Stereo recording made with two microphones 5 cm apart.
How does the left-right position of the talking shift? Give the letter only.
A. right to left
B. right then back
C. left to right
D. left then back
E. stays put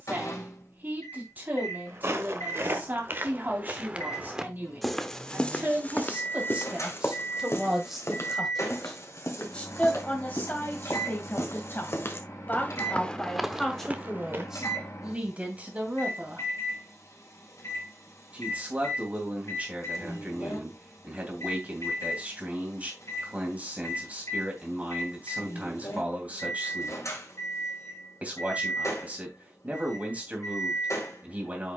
D.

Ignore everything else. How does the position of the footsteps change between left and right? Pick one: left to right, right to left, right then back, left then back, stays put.
left then back.